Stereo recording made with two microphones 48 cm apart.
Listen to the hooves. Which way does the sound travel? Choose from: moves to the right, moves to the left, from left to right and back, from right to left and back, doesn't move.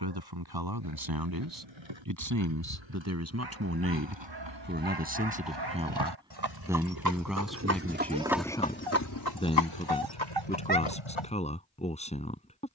moves to the left.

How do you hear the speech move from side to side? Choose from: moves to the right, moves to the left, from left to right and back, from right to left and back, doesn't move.
moves to the left.